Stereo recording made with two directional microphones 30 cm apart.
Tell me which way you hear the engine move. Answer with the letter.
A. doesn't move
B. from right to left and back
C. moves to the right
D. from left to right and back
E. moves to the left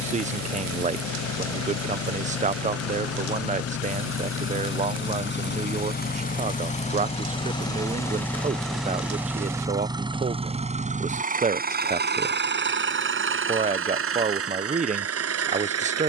C.